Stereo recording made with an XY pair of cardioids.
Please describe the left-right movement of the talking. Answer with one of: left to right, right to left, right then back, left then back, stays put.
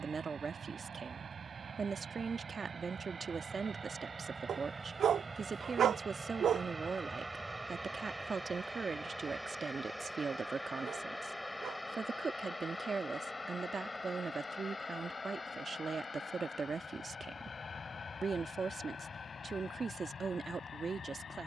stays put.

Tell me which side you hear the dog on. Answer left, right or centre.
right.